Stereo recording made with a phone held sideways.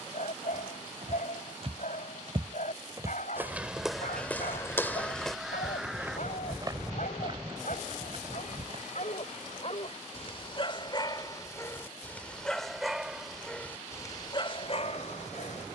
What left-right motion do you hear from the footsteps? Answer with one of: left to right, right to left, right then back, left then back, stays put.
left then back.